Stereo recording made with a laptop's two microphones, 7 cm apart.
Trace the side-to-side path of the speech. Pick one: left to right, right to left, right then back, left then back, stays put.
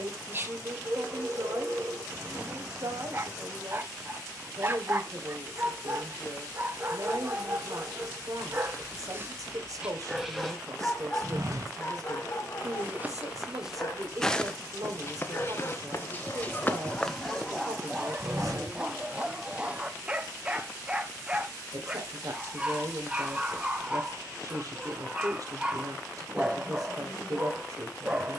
stays put.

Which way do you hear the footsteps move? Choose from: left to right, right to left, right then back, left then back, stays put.
left then back.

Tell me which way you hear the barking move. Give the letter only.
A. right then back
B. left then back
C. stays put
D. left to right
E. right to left
B.